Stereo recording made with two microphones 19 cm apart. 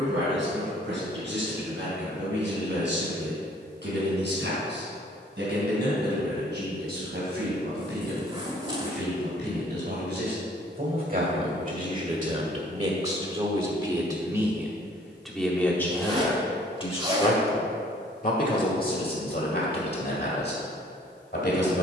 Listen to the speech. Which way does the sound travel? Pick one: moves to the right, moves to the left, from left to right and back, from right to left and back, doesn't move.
moves to the left.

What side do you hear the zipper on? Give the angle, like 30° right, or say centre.
30° right.